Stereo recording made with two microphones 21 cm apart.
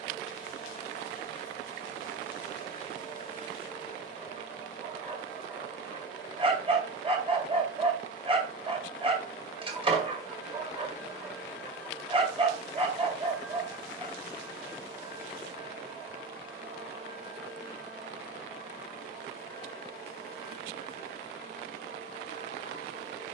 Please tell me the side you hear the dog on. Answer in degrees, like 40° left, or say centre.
20° right.